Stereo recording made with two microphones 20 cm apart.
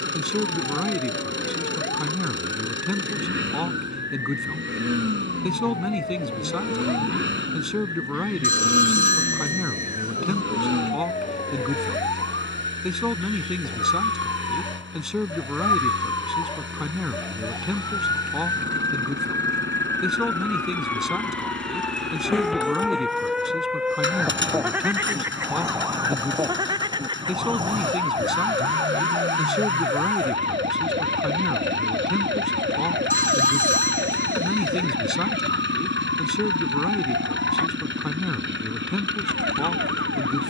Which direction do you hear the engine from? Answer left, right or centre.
right.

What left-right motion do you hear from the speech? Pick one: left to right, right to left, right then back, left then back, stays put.
stays put.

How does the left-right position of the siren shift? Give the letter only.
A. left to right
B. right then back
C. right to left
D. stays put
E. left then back
A.